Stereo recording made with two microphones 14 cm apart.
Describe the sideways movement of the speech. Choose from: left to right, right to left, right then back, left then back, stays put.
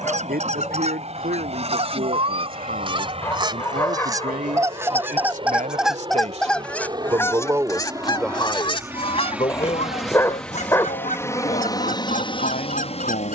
right to left.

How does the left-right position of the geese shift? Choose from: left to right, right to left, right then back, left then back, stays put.
right to left.